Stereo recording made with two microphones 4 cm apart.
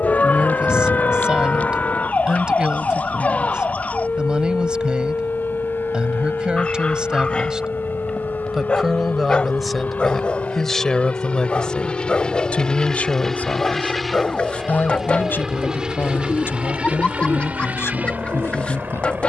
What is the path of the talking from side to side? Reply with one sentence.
You can hear the talking move to the left.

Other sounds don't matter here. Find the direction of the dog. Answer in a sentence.
In this clip you hear the dog on the left.